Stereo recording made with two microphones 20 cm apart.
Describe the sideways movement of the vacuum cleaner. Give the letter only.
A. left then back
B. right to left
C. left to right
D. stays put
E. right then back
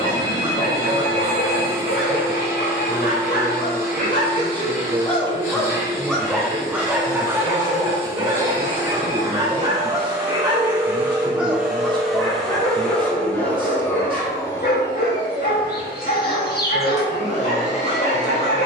B.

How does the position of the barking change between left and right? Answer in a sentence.
In this clip you hear the barking move from left to right and back again.